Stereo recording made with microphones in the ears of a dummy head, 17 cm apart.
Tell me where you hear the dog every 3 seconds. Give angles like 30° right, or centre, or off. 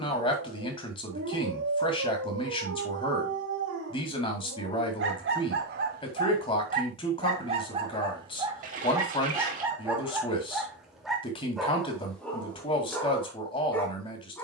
70° right, 60° right, 30° right, 10° right, 10° left.